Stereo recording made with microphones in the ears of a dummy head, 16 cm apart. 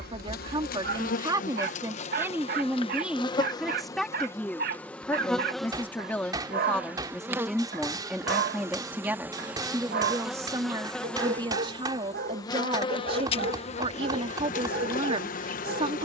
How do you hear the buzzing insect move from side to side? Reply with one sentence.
You can hear the buzzing insect go right and come back.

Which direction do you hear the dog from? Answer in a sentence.
In this clip you hear the dog on the right.